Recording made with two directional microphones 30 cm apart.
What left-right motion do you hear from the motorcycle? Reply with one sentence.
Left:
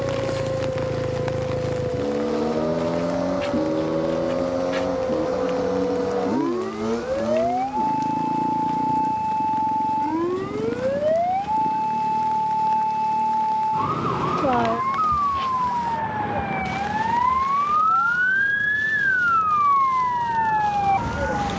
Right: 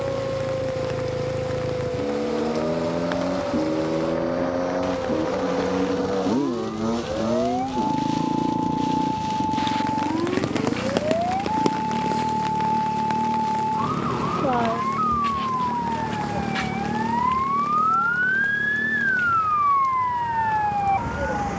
You can hear the motorcycle move to the right.